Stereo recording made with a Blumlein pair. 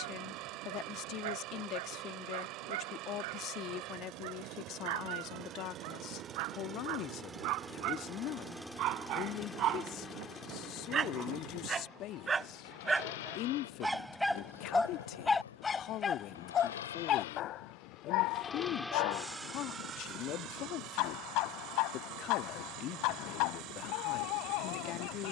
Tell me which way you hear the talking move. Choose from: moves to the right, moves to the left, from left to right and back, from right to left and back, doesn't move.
doesn't move.